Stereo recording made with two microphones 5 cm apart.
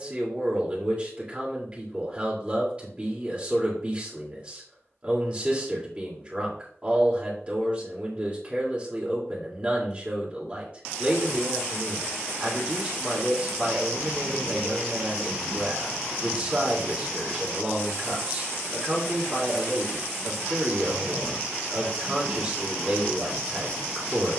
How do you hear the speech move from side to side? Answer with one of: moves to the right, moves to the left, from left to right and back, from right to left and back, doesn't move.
doesn't move.